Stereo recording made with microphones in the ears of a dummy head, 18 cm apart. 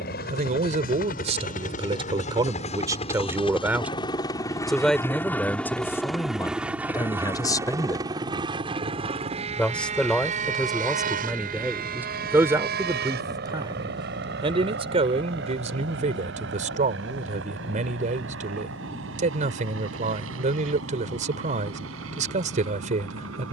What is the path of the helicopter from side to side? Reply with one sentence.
In this clip you hear the helicopter move to the right.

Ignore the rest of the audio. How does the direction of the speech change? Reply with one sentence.
In this clip you hear the speech move from right to left and back again.